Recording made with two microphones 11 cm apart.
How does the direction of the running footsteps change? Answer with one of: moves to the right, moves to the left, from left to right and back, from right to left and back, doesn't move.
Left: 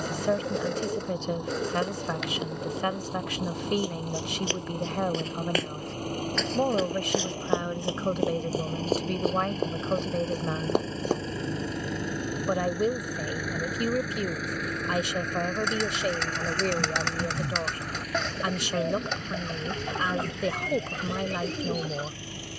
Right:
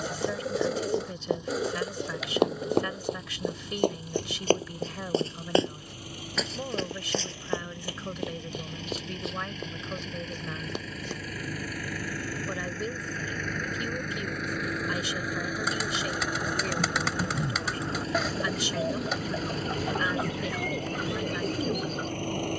moves to the left.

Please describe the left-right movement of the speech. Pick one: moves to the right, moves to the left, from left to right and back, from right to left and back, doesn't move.
doesn't move.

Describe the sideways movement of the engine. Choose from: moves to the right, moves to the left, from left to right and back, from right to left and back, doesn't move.
moves to the right.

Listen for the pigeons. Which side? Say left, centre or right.
centre.